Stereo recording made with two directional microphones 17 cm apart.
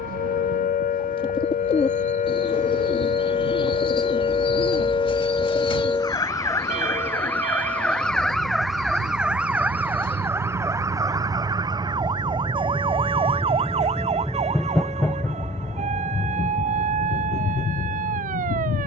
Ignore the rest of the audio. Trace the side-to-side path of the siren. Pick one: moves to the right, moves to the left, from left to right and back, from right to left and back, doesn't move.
moves to the right.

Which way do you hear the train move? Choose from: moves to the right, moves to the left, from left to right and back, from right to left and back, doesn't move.
moves to the left.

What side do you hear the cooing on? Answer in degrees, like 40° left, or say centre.
30° left.